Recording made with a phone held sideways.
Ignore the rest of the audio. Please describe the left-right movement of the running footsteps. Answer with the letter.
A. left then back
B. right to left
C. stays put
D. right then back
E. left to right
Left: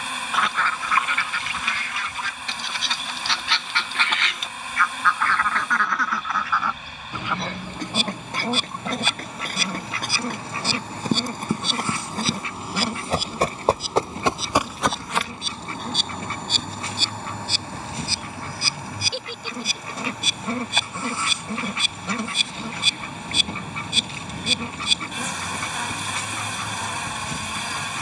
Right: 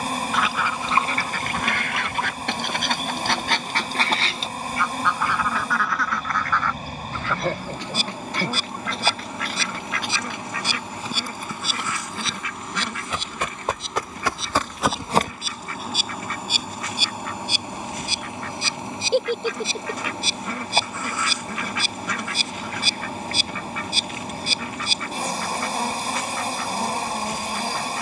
E.